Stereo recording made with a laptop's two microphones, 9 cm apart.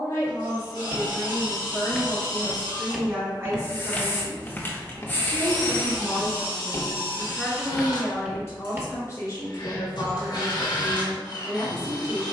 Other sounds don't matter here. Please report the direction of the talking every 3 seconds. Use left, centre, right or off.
left, right, centre, left.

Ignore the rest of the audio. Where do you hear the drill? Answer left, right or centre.
left.